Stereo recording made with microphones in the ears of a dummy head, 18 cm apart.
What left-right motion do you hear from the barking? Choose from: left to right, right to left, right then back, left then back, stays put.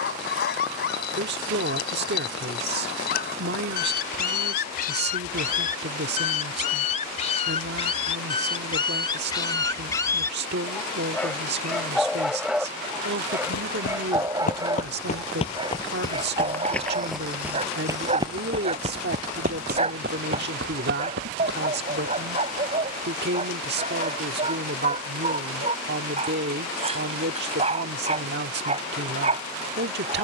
left to right.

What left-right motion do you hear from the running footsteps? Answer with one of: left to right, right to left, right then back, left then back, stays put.
left to right.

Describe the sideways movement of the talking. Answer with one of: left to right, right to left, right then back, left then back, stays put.
stays put.